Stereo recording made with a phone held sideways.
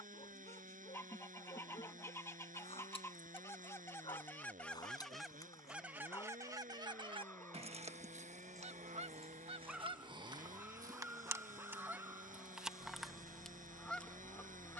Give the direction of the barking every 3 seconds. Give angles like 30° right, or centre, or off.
40° left, 30° left, 10° left, 10° right, 30° right.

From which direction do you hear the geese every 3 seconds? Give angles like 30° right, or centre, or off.
20° left, 10° left, 40° right, 30° right, centre.